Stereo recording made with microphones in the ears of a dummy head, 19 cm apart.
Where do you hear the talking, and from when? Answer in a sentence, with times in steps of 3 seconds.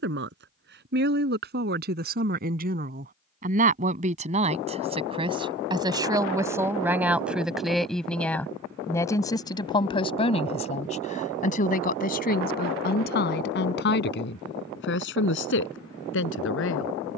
In this clip you hear the talking on the right from 0 s, in the centre from 6 s and on the left from 9 s.